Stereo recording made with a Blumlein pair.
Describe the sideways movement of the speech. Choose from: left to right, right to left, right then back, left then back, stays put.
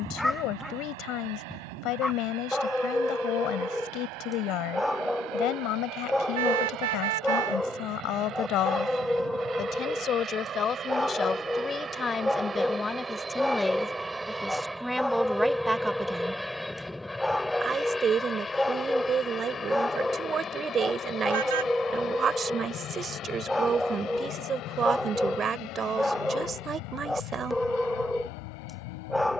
left to right.